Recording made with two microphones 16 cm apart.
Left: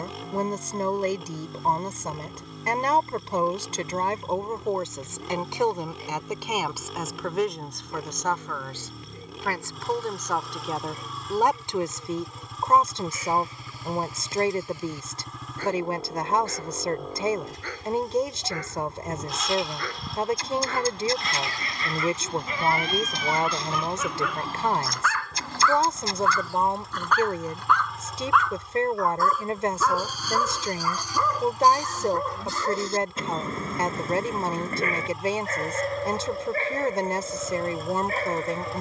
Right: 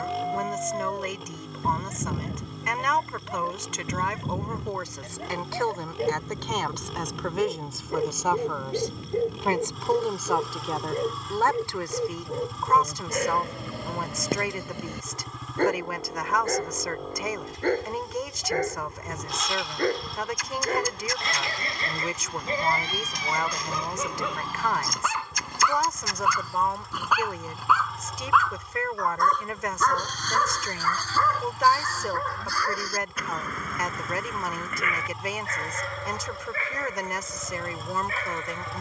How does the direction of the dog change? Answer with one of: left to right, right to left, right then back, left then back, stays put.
right to left.